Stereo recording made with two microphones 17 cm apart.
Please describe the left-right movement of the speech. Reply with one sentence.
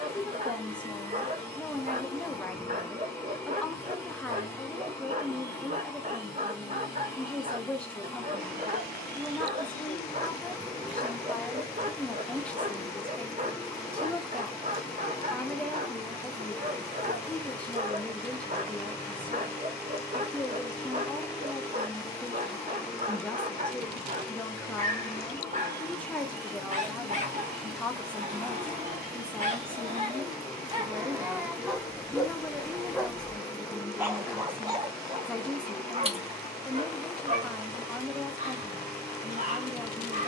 You can hear the speech stay put.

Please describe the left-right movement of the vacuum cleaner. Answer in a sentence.
In this clip you hear the vacuum cleaner stay in one place.